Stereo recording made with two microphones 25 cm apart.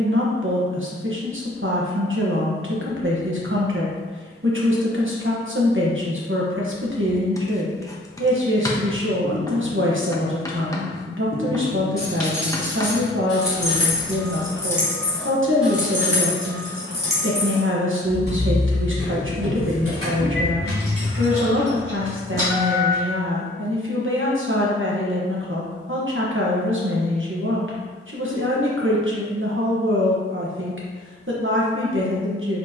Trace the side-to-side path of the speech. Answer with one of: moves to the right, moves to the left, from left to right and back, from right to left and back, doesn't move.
doesn't move.